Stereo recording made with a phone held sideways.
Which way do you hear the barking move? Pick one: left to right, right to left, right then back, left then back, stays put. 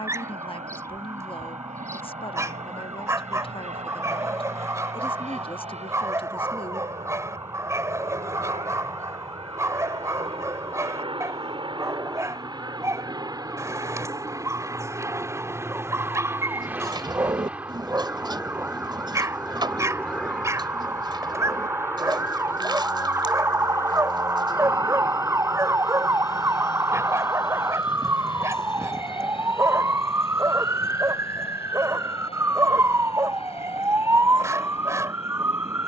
stays put.